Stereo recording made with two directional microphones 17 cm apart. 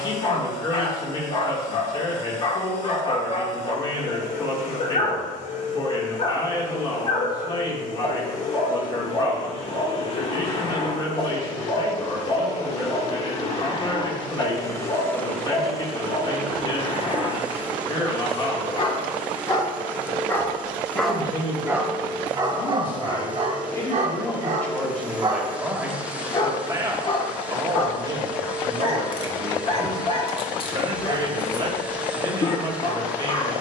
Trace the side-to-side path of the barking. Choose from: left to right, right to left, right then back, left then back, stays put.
right then back.